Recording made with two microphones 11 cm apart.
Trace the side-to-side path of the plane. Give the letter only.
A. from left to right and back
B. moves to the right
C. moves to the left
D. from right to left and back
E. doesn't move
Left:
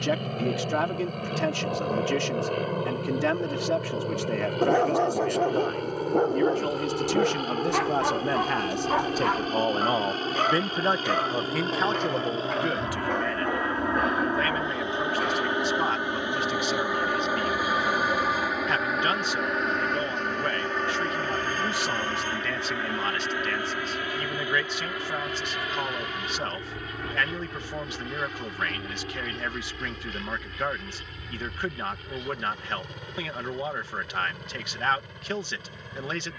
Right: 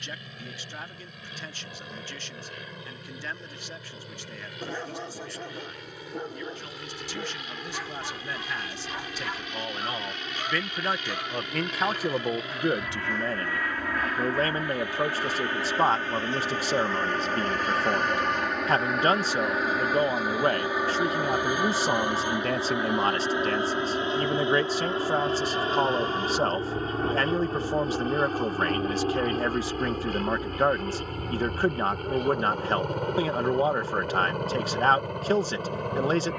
B.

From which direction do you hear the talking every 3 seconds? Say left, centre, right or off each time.
left, left, left, left, right, right, right, right, right, right, right, right.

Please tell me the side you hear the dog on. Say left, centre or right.
left.